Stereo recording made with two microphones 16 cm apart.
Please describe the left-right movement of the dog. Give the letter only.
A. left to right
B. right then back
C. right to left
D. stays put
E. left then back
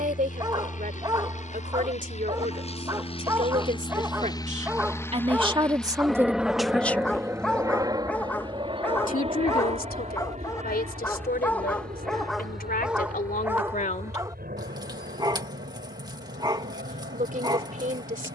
E.